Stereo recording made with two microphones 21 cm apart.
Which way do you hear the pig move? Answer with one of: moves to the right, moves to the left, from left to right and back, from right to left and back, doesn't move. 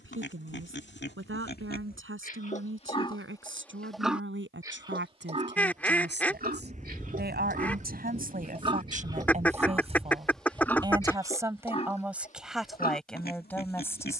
from left to right and back.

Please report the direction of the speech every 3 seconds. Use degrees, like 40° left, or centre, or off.
70° right, 60° right, 50° right, 20° right, centre.